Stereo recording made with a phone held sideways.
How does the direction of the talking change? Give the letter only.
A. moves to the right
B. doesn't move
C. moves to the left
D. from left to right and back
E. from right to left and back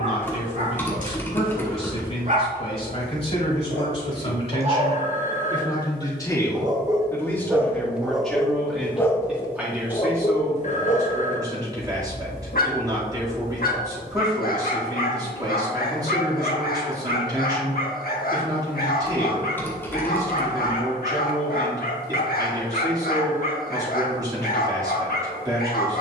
A.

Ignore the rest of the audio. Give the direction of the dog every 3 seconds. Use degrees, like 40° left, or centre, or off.
50° right, 40° right, 10° right, 40° left, 70° left, 70° left, 70° left, 70° left, 70° left.